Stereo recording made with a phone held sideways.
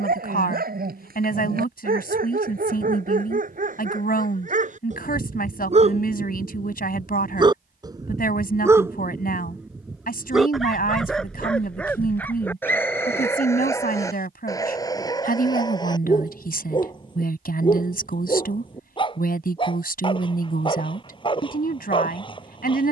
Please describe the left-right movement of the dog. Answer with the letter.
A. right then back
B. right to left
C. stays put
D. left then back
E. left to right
B.